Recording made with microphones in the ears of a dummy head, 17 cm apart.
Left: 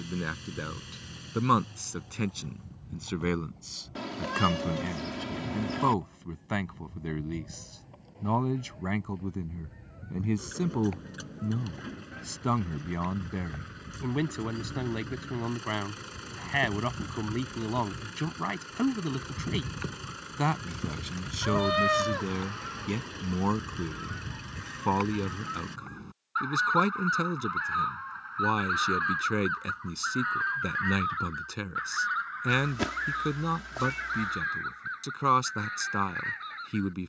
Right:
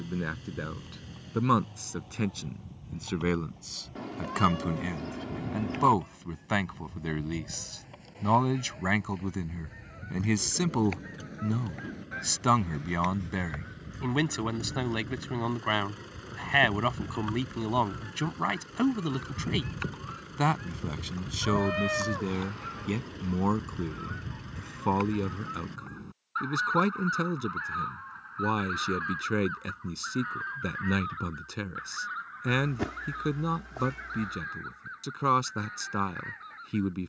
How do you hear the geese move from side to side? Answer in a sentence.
In this clip you hear the geese move from right to left.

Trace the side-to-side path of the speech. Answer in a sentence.
In this clip you hear the speech go right and come back.